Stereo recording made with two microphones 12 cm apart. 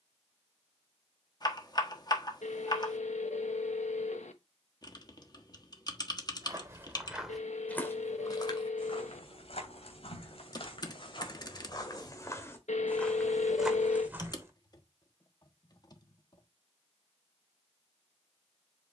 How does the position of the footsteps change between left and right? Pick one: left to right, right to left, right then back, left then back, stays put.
left then back.